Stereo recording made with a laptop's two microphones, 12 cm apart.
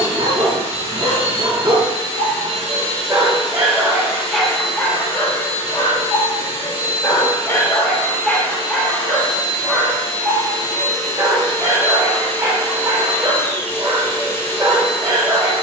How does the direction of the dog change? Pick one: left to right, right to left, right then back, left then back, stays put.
left then back.